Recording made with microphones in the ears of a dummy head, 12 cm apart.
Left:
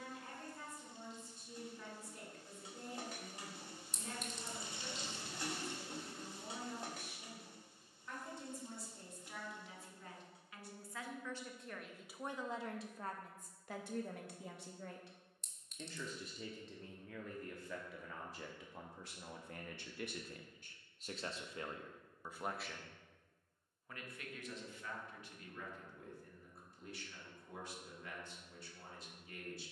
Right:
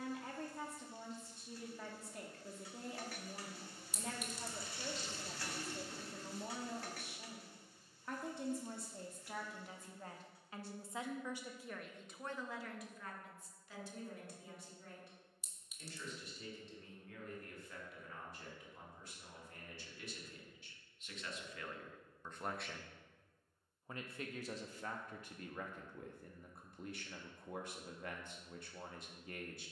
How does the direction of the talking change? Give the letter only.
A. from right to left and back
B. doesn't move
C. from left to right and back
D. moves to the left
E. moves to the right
A.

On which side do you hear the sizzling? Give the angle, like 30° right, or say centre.
20° left.